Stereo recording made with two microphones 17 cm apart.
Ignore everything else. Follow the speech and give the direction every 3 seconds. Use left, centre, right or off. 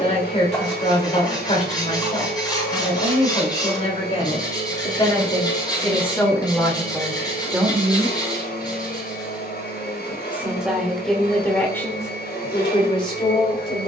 left, left, centre, centre, left.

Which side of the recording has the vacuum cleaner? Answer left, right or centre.
left.